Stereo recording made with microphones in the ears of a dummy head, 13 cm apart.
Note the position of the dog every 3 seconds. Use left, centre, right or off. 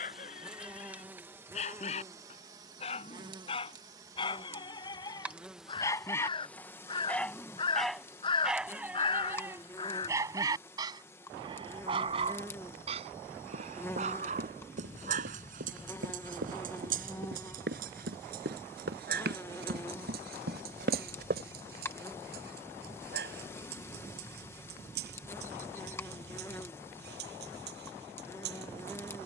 left, left, centre, right, right, right, right, right, right, right.